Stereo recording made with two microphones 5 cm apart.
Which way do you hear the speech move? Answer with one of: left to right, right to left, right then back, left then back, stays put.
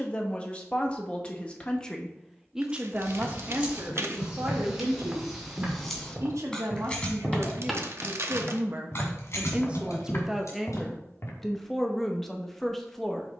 right then back.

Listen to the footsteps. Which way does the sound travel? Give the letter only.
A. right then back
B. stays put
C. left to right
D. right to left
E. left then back
A.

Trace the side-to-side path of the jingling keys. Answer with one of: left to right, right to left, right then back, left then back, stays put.
right to left.